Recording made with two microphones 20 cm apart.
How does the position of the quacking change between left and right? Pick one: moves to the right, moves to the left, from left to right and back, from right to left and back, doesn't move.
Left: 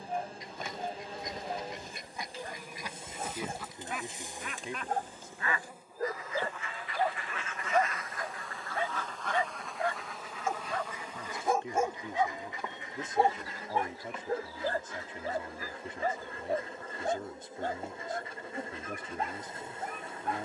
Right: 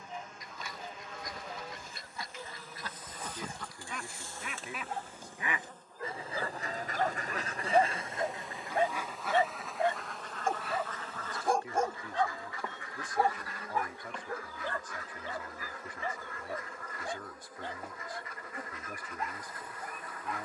from left to right and back.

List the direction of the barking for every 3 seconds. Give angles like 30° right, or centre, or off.
50° left, 50° left, 10° right, 10° right, 30° left, 50° left, 50° left.